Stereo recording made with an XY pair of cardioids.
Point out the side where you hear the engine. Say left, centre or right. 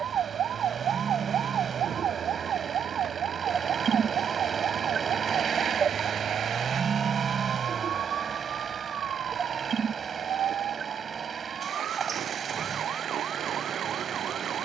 right.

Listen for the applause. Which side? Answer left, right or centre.
right.